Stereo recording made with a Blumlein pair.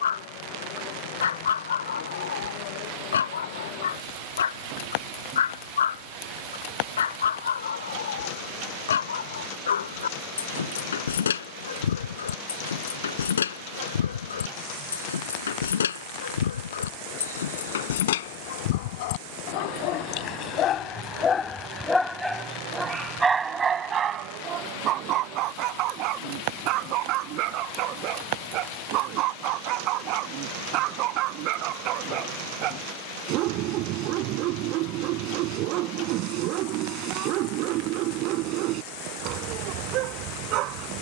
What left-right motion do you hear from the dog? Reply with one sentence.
In this clip you hear the dog move from left to right.